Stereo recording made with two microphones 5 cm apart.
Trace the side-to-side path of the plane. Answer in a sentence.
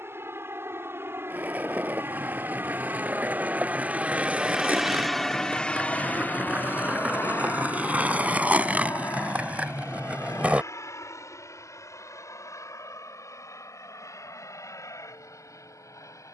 In this clip you hear the plane move from right to left.